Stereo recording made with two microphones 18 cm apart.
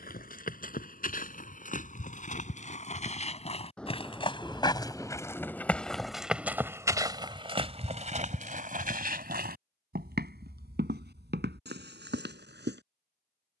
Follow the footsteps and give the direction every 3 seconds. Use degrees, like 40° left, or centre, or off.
50° left, 20° left, 30° right, 70° right, 80° right.